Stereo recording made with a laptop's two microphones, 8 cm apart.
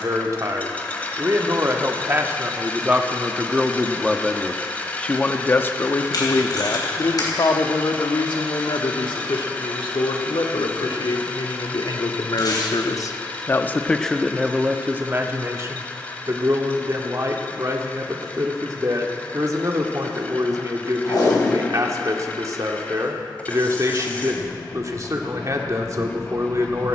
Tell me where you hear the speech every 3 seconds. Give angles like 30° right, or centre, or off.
30° right, 10° left, 50° left, 70° left, 20° left, 40° right, 40° right, 40° right, 40° right.